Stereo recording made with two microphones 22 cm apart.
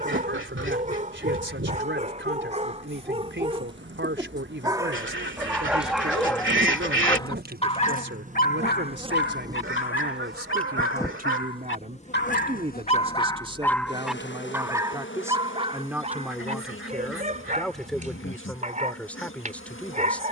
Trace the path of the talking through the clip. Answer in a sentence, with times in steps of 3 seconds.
You can hear the talking on the right from 0 s and in the centre from 15 s.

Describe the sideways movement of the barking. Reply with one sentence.
In this clip you hear the barking move from right to left and back again.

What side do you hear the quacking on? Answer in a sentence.
You can hear the quacking on the right.